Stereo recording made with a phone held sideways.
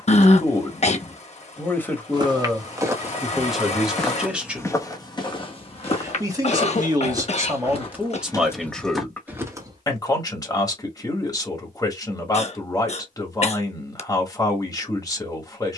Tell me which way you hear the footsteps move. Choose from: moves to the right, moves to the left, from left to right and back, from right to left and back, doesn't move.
from right to left and back.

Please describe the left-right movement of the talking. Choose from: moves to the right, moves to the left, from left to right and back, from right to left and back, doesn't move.
from left to right and back.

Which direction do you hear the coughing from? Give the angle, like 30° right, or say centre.
50° left.